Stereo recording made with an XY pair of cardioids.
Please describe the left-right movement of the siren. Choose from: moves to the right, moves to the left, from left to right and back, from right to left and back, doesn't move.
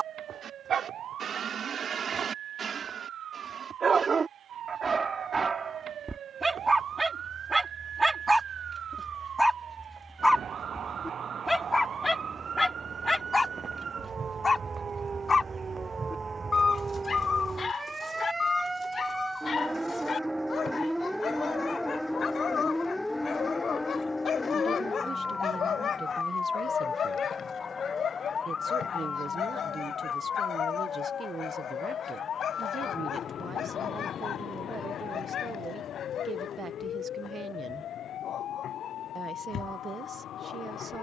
moves to the left.